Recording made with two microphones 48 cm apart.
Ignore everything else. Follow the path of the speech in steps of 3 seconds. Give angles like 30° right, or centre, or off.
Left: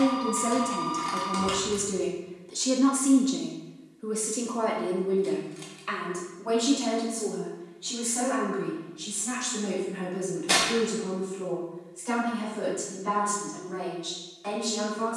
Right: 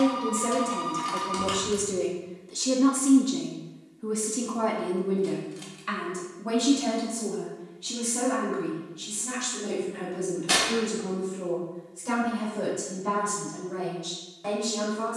20° left, 20° right, 50° right, 60° right, 70° right.